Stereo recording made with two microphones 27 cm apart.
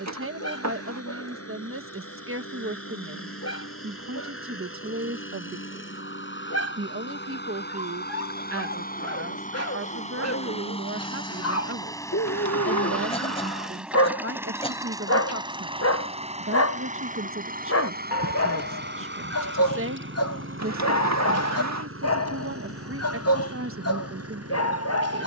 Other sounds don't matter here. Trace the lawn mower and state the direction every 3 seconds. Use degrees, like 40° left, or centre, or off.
60° left, 50° left, 40° left, 20° left, centre, 20° right, 40° right, 60° right, 60° right.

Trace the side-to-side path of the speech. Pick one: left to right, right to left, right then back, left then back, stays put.
stays put.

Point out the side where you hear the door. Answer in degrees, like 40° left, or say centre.
80° right.